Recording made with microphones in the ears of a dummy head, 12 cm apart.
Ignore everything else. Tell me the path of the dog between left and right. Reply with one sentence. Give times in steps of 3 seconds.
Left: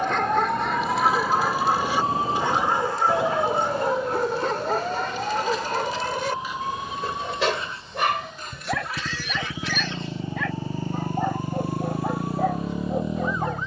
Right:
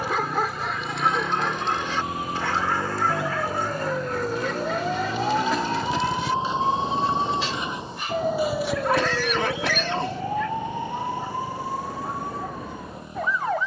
In this clip you hear the dog in the centre from 0 s and on the left from 3 s.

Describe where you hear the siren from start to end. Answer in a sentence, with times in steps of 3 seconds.
You can hear the siren on the left from 0 s, in the centre from 3 s and on the right from 6 s.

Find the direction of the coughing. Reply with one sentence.
You can hear the coughing on the right.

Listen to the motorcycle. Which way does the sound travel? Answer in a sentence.
You can hear the motorcycle travel towards the left.